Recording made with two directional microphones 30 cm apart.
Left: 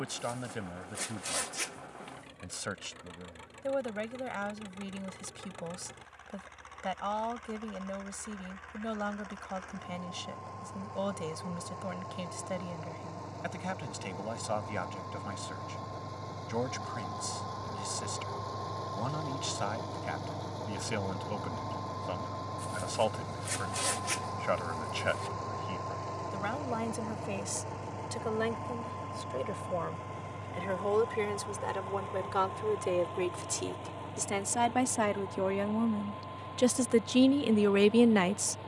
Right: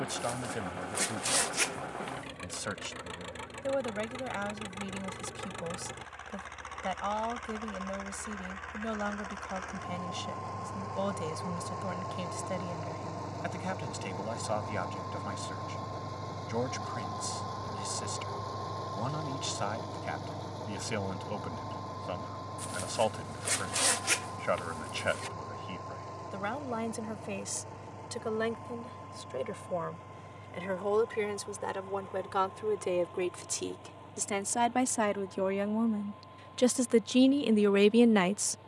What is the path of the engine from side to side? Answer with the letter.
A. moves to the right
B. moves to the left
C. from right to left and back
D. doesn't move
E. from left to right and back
B.